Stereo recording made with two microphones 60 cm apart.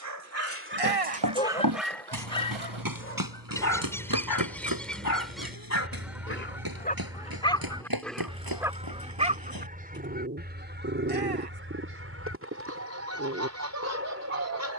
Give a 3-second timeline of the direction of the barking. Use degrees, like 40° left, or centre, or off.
10° right, 30° left, 10° left, 20° right, 20° right.